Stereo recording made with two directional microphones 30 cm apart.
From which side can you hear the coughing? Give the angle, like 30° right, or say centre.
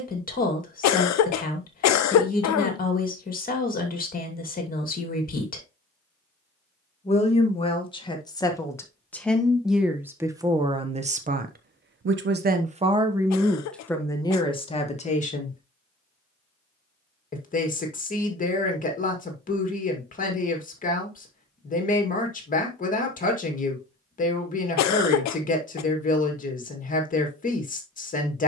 60° left.